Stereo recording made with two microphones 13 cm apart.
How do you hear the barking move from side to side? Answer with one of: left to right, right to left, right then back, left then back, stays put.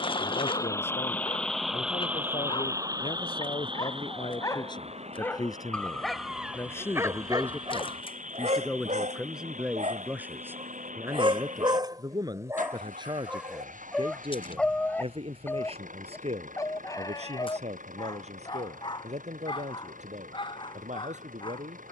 right then back.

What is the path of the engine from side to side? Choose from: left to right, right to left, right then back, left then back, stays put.
left to right.